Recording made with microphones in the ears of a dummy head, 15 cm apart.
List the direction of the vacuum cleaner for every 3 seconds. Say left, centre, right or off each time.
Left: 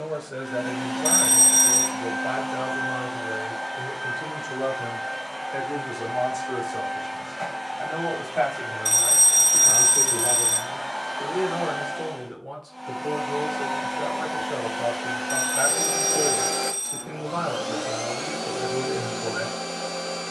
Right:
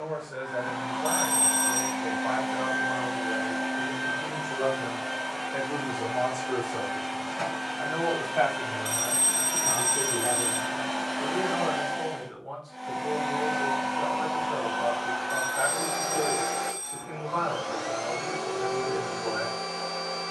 centre, right, right, right, centre, left, left.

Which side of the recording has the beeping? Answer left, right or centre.
left.